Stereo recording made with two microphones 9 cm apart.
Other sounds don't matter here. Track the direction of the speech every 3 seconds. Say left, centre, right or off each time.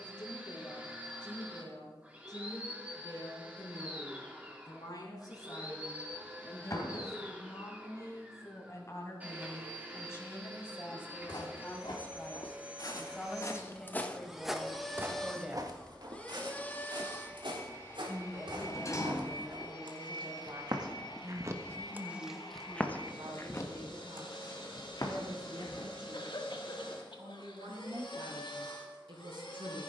left, left, left, left, centre, centre, right, right, right, right.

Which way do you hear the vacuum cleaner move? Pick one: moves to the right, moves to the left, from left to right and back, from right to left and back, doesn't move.
moves to the left.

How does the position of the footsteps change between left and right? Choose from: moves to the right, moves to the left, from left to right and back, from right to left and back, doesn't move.
from left to right and back.